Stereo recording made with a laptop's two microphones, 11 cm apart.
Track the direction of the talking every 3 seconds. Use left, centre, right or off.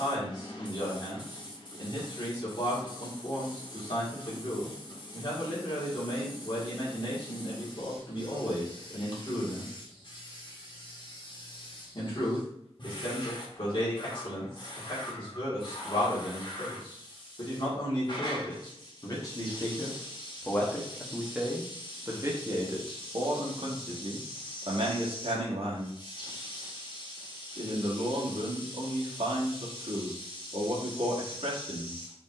left, left, left, left, left, left, left, right, right, right, right.